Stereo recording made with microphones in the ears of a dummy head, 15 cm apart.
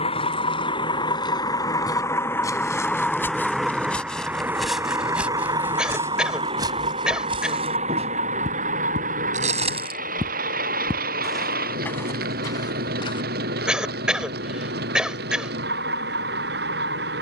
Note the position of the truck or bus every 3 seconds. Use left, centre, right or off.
left, centre, right, right, right, right.